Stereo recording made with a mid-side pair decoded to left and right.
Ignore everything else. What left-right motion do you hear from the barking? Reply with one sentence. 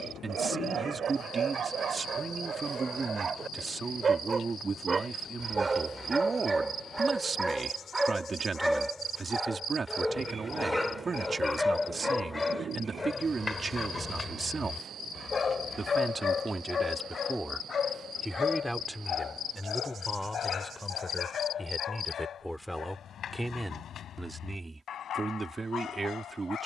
In this clip you hear the barking travel towards the left.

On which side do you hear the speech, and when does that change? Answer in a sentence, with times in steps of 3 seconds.
In this clip you hear the speech on the right from 0 s, in the centre from 18 s and on the right from 24 s.